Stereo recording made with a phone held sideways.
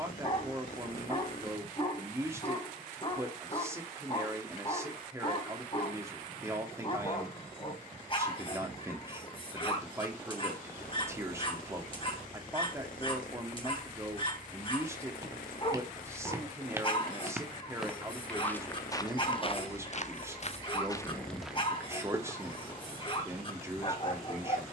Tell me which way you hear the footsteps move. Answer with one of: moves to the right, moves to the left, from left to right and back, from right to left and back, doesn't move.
from right to left and back.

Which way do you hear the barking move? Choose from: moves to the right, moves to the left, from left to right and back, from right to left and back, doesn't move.
doesn't move.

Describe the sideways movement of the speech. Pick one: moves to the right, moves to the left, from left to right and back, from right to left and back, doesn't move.
doesn't move.